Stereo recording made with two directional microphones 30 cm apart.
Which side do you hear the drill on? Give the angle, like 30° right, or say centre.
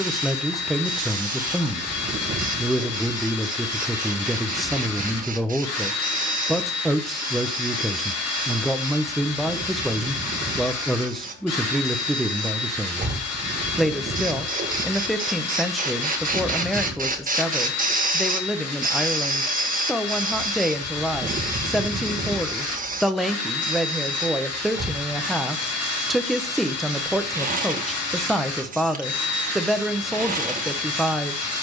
50° left.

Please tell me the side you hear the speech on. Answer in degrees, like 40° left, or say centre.
centre.